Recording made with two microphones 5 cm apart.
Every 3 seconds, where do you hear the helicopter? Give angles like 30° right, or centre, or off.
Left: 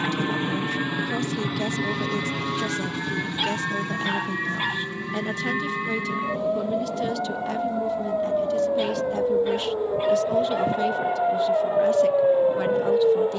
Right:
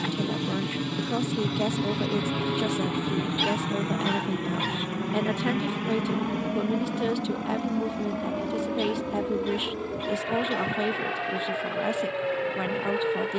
10° left, 40° right, 60° right, 70° right, 70° right.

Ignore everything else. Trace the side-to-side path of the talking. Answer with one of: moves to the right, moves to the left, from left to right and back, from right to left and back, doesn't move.
doesn't move.